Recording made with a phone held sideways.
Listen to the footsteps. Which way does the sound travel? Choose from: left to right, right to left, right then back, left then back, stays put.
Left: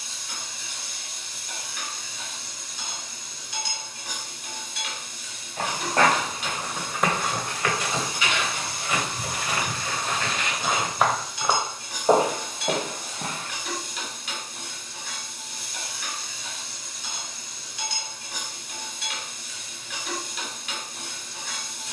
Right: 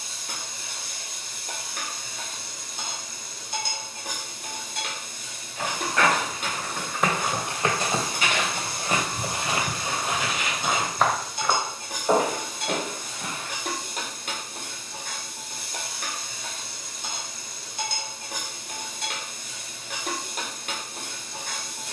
right then back.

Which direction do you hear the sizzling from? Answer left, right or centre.
right.